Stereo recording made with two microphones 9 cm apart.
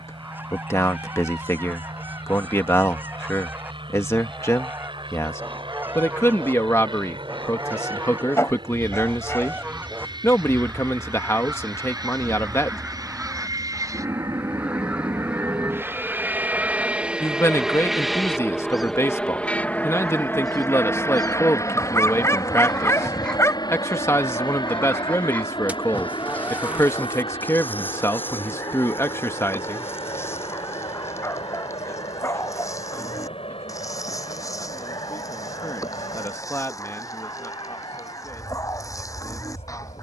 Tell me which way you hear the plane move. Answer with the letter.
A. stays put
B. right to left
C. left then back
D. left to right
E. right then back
B.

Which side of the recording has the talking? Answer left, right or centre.
left.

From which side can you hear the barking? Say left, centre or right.
left.